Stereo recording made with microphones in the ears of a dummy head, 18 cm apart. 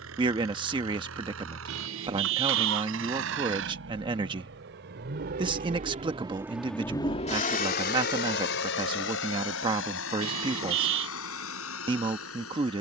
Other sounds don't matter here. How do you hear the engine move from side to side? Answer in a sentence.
You can hear the engine move to the left.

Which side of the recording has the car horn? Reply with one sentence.
In this clip you hear the car horn on the right.